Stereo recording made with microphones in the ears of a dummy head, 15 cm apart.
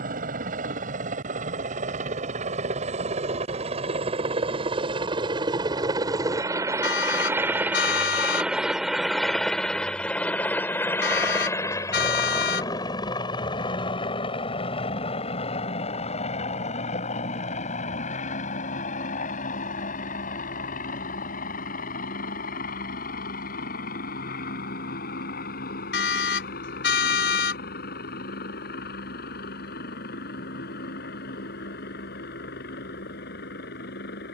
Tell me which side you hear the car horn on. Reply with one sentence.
In this clip you hear the car horn on the left.